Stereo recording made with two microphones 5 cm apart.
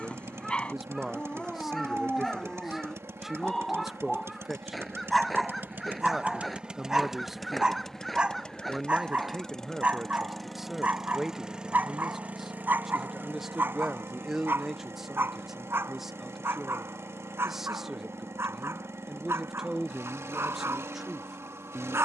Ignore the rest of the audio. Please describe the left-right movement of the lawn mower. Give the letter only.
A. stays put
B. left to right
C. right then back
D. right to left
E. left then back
E.